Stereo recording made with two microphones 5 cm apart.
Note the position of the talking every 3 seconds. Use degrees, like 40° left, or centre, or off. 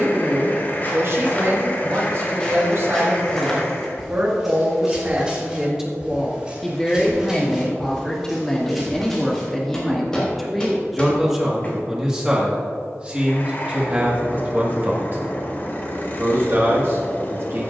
60° right, 40° right, 10° left, 10° right, 30° right, 50° right.